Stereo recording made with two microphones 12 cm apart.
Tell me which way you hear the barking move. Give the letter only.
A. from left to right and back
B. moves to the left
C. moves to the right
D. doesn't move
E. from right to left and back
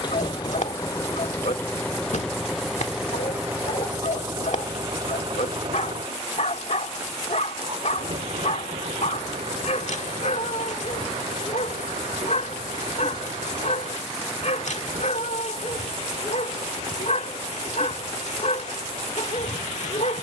D.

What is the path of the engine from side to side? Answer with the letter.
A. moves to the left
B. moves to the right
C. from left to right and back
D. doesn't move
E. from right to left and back
B.